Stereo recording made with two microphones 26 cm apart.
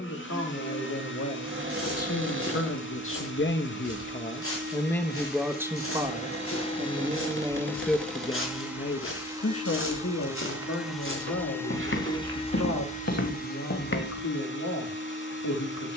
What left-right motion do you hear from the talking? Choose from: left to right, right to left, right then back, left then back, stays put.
right then back.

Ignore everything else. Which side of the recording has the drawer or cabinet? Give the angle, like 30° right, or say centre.
50° right.